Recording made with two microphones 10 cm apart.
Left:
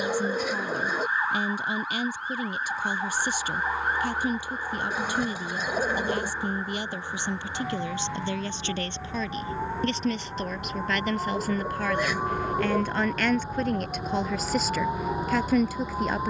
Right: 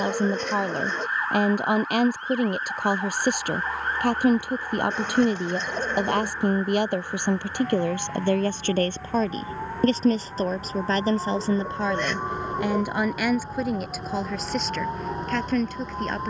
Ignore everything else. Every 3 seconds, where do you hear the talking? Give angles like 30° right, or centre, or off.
60° right, 60° right, 60° right, 40° right, 10° right, 10° left.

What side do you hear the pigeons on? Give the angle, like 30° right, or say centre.
10° left.